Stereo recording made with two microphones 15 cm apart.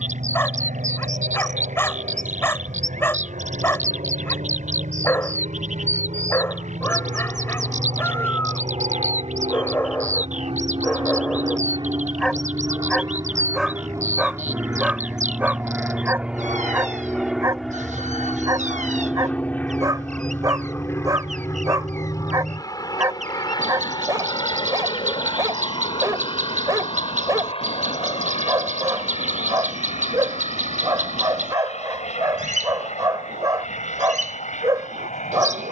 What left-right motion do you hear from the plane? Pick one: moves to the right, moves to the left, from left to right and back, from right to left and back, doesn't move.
moves to the left.